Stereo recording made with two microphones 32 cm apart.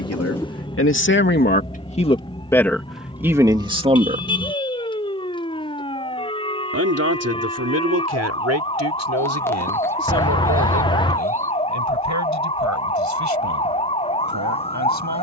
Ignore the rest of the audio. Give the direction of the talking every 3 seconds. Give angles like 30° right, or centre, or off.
30° left, 10° right, 50° right, 60° right, 60° right.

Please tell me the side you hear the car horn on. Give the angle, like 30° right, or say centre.
10° left.